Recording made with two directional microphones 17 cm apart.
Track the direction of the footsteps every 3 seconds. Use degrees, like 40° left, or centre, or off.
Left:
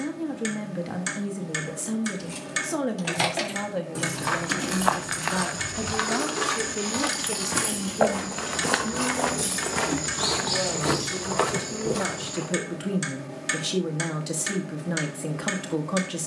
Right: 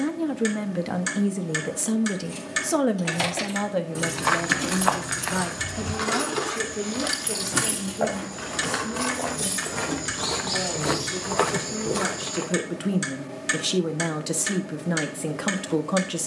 off, 10° left, 50° left, 10° left, 20° right, off.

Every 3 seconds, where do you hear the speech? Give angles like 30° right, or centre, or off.
30° right, 10° right, 10° left, 10° left, 10° right, 10° right.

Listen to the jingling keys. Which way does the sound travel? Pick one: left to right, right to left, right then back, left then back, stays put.
right then back.